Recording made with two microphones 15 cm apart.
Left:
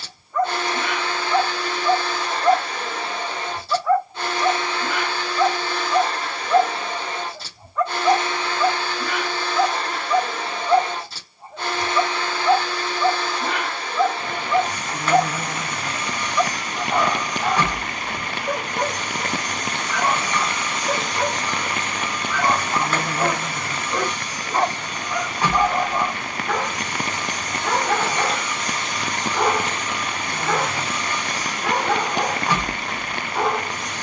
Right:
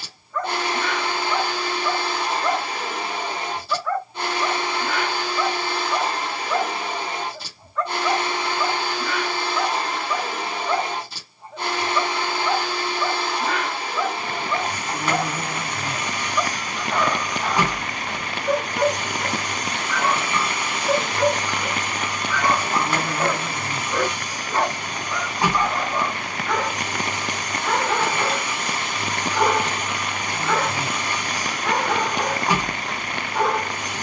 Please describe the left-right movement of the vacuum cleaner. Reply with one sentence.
In this clip you hear the vacuum cleaner stay put.